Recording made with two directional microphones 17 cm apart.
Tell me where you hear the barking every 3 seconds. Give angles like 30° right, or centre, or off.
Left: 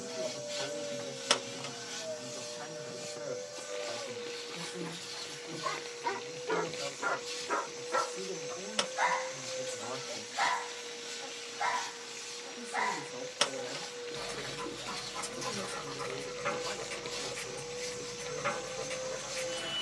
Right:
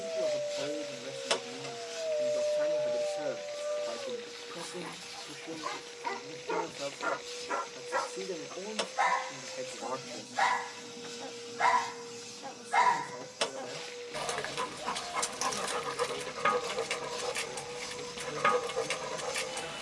70° right, 40° right, 10° left, 20° right, 60° right, 60° right, 60° right.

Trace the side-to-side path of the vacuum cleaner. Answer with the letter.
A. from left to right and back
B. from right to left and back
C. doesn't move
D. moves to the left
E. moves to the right
C.